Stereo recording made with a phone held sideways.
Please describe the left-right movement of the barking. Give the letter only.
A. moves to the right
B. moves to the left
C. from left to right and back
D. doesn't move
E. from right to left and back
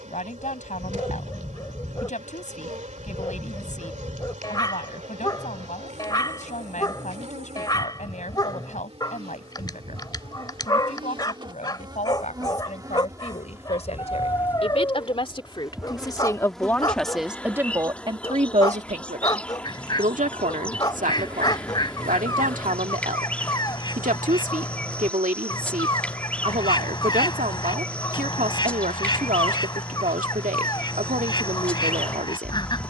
D.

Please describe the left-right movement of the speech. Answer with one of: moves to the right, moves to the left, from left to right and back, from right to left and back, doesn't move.
moves to the right.